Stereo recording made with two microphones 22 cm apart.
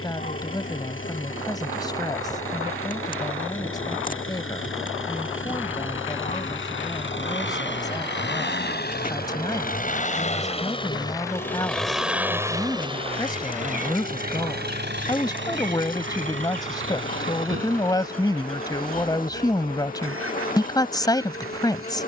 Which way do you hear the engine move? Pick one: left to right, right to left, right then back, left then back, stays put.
left to right.